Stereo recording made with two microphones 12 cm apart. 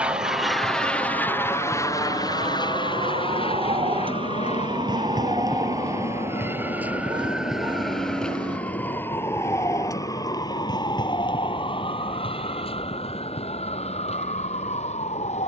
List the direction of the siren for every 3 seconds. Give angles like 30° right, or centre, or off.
60° right, 40° right, centre, 30° left, 50° left.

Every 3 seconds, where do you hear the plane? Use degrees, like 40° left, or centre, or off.
20° left, 50° left, 60° left, 70° left, 70° left.